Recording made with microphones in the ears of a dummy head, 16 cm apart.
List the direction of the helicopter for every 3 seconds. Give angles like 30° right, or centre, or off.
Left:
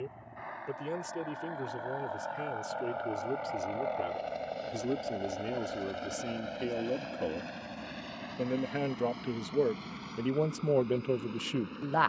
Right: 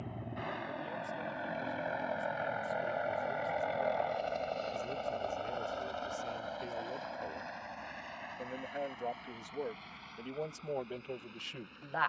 30° right, centre, 40° left, 60° left.